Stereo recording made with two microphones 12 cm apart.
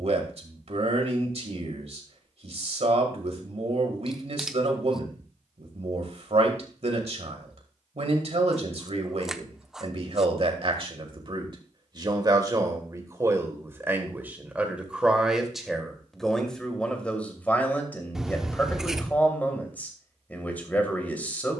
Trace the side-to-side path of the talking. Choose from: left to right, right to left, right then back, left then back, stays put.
right to left.